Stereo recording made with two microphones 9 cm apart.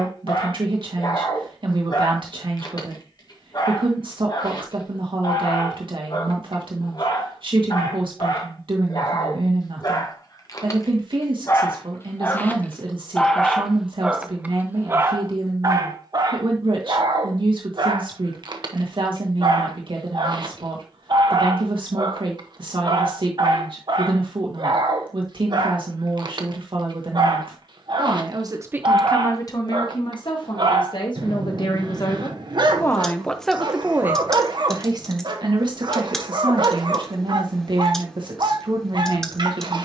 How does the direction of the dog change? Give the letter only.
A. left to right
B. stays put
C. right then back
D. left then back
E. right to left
A.